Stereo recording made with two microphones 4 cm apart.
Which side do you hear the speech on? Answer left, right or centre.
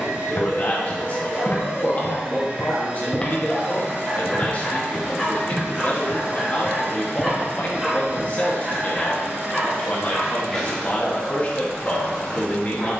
left.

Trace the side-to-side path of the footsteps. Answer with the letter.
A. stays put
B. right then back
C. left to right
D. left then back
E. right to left
C.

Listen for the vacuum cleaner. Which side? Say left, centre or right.
right.